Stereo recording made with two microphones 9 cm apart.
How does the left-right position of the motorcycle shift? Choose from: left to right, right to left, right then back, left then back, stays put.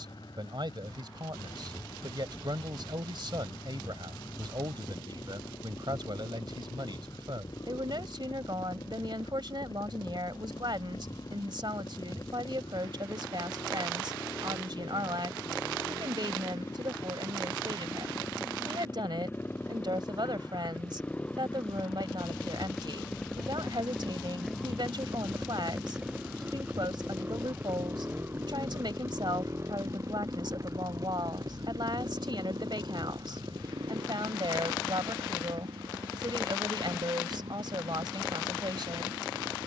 left to right.